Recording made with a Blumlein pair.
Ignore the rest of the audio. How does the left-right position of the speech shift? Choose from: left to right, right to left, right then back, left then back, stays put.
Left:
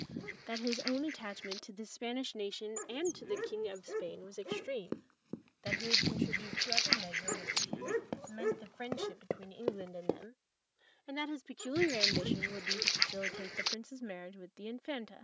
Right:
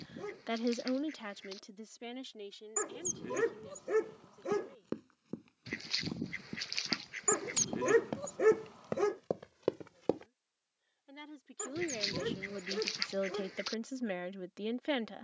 left then back.